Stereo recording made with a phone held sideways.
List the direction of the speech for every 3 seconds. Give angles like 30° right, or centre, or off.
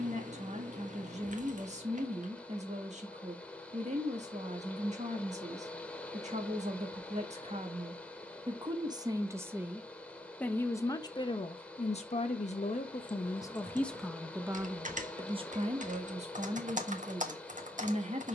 50° right, 50° right, 40° right, 10° left, 20° left, 40° right.